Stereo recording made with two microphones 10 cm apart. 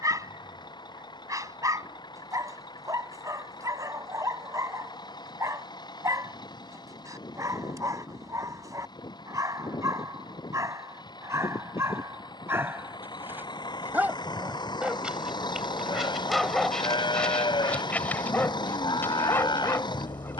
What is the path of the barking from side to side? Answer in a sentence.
In this clip you hear the barking move from right to left.